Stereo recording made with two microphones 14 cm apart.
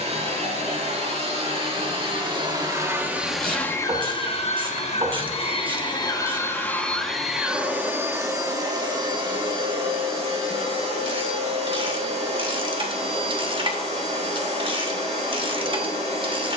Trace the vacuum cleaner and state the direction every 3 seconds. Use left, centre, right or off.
right, left, centre, right, right, right.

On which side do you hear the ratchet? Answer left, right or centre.
right.